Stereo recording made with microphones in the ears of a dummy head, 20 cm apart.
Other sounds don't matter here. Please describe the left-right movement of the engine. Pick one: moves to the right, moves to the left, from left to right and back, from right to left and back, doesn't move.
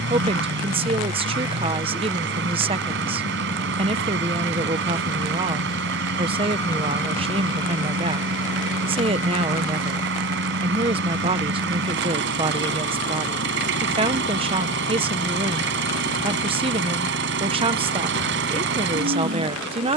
doesn't move.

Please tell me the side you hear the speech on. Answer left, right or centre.
right.